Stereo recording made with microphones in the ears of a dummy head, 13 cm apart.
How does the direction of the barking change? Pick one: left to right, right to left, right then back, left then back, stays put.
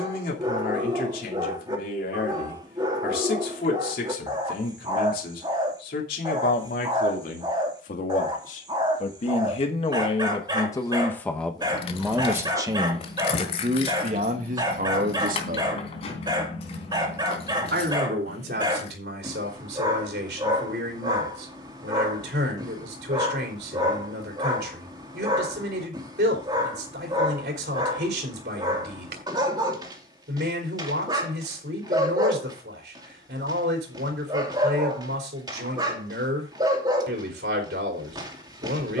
stays put.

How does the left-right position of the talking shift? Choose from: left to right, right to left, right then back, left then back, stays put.
left to right.